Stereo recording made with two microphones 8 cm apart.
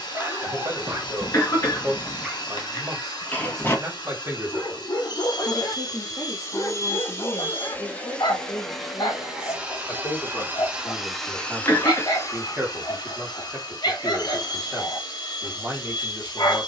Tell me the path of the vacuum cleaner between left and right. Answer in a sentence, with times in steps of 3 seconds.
In this clip you hear the vacuum cleaner on the left from 0 s, in the centre from 9 s and on the left from 12 s.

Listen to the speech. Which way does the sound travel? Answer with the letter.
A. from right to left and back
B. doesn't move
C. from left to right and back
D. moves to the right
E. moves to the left
A.